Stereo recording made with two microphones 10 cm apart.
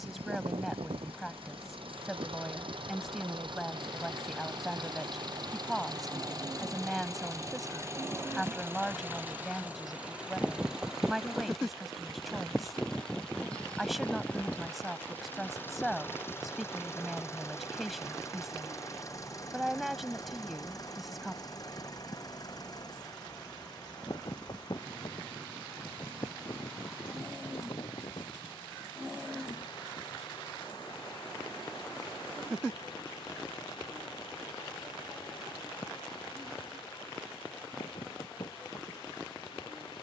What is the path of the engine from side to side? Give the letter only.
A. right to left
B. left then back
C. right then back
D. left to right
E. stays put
A.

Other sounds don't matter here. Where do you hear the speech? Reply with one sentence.
In this clip you hear the speech in the centre.